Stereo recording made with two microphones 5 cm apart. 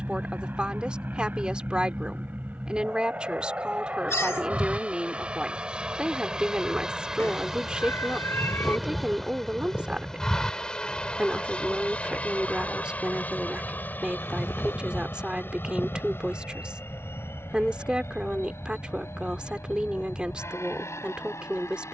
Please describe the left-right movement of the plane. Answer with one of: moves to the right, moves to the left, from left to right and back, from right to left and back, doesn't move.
moves to the left.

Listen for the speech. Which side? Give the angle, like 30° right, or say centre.
20° right.